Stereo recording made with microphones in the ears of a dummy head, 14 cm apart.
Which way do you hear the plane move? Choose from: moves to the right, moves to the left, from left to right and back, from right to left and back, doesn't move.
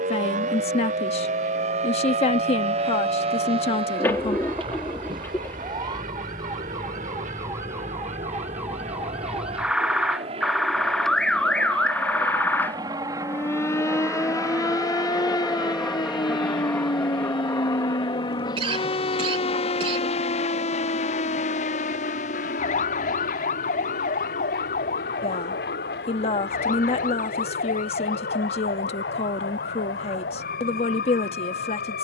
moves to the left.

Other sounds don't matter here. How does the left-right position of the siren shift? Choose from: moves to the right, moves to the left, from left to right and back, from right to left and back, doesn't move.
moves to the left.